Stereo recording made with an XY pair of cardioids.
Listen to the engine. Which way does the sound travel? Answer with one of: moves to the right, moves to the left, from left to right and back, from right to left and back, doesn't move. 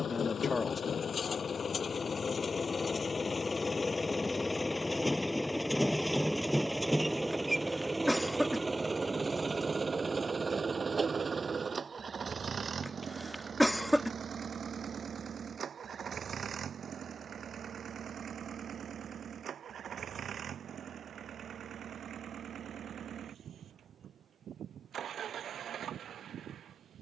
moves to the right.